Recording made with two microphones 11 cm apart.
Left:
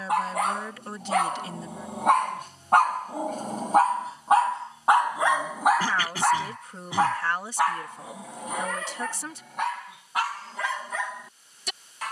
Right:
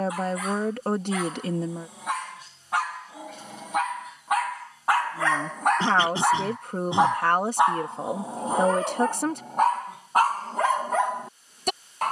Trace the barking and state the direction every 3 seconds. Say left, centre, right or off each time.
left, left, right, right.